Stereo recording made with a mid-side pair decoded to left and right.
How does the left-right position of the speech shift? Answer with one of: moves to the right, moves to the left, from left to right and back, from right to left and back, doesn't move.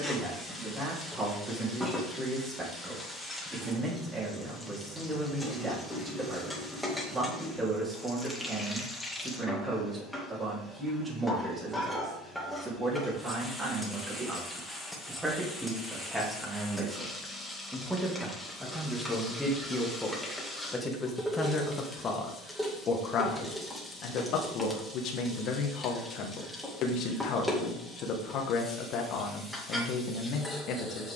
moves to the left.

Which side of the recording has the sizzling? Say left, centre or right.
centre.